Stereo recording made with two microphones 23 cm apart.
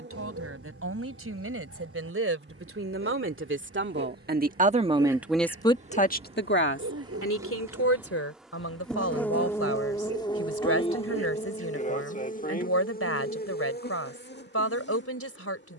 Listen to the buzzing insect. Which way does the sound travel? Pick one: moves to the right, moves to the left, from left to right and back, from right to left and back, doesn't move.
moves to the left.